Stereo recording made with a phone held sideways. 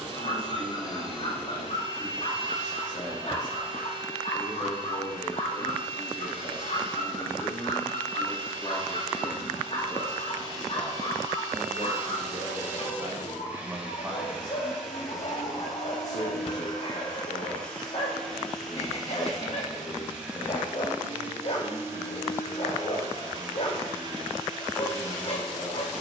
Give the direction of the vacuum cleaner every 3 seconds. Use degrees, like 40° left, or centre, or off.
40° right, 40° right, 40° right, 30° right, 10° right, centre, centre, 30° right, 30° right.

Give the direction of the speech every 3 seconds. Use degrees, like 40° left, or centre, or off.
30° left, 30° left, 30° left, 10° left, 30° right, 30° left, 30° left, 30° left, 30° left.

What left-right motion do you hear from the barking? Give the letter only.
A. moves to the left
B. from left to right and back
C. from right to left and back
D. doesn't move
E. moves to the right
D.